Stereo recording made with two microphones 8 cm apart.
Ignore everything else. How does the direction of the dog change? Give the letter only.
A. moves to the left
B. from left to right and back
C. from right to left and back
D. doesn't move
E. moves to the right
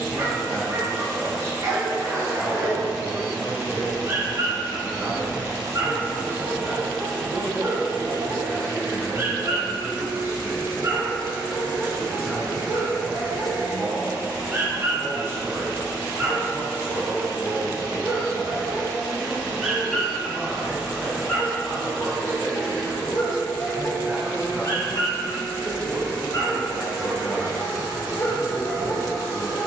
A.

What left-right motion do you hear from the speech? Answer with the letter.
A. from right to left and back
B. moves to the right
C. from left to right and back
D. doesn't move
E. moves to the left
D.